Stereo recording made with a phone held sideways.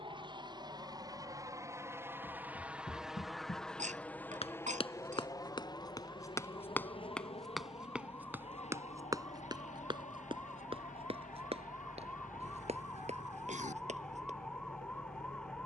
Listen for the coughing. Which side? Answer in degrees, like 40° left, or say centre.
70° right.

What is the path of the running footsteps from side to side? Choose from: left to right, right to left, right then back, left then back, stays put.
left to right.